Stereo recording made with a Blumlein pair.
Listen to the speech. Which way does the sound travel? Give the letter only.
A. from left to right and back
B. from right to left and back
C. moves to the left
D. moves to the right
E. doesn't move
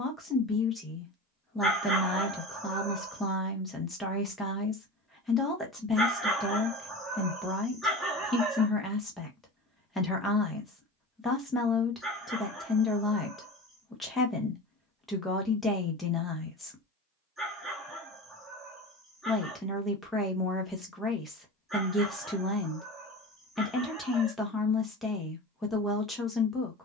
E.